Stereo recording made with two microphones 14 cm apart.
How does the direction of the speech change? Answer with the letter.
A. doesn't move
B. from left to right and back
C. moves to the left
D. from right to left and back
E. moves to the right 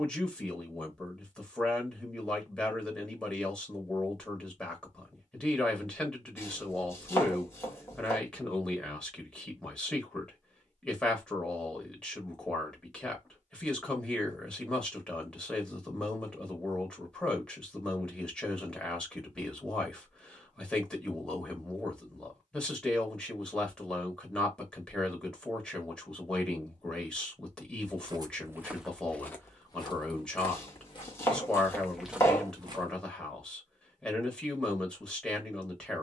A.